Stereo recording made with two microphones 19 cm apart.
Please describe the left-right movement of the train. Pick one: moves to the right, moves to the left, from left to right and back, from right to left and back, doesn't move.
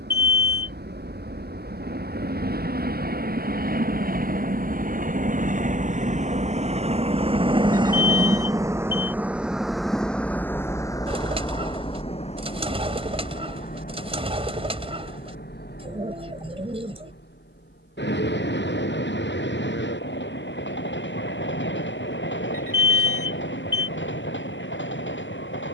moves to the left.